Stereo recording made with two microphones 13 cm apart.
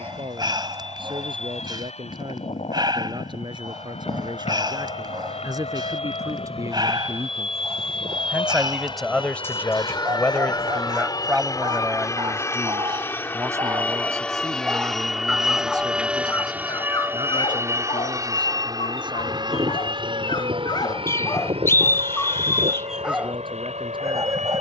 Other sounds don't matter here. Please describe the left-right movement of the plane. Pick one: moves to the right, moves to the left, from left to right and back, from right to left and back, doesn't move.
moves to the right.